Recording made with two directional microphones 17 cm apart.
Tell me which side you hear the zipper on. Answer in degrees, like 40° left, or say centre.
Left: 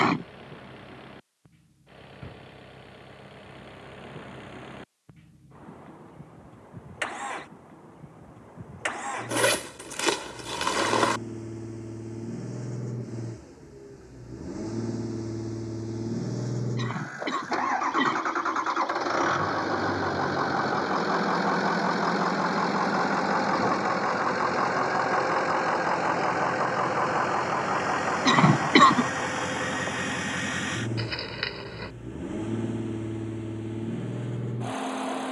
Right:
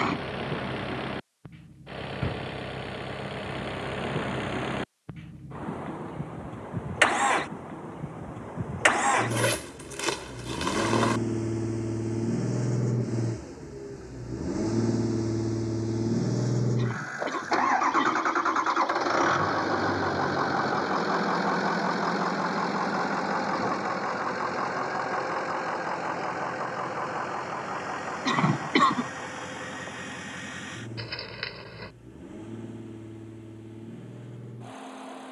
20° left.